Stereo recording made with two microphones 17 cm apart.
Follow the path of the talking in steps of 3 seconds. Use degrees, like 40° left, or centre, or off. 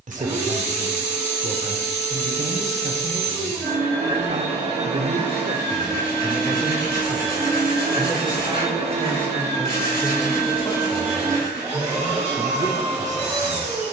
50° right, 40° right, 10° right, 10° left, 30° right.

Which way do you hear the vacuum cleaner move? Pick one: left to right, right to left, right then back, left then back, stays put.
stays put.